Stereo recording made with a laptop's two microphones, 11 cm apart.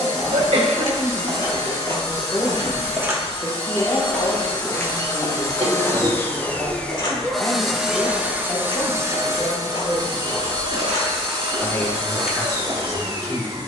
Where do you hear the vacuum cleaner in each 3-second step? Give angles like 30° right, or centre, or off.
60° left, 40° left, centre, 40° right, 40° right.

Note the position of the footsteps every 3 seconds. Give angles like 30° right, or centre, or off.
40° right, 10° left, 50° left, 50° left, 20° right.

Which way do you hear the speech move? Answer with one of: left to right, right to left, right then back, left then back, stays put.
stays put.